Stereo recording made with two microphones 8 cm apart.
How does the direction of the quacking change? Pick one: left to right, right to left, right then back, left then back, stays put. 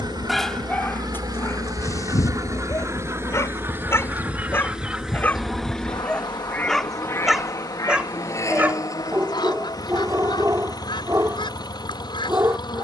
right to left.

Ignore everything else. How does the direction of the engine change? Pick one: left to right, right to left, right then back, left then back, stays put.
right to left.